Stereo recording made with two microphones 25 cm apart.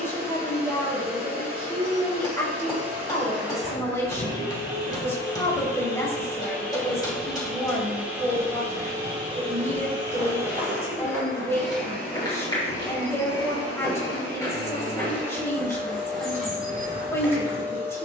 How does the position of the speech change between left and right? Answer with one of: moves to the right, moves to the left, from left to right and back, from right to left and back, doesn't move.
doesn't move.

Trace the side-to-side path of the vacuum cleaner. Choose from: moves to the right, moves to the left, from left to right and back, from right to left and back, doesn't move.
from left to right and back.